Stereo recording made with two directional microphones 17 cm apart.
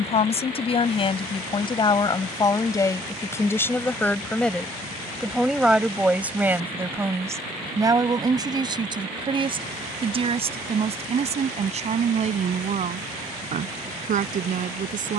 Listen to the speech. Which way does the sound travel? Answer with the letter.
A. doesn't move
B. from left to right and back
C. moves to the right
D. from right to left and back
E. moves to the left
C.